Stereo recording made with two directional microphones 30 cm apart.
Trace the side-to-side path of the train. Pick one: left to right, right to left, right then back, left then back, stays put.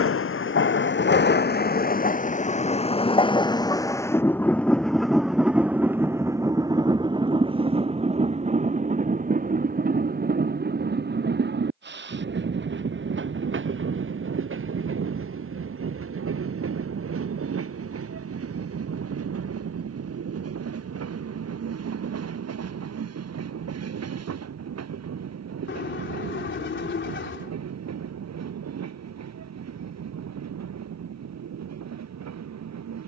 left to right.